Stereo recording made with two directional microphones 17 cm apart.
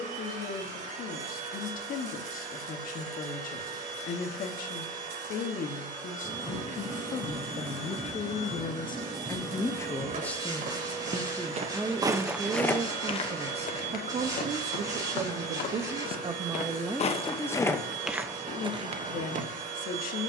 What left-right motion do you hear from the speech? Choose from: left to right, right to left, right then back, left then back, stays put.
right then back.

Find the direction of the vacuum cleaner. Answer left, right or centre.
right.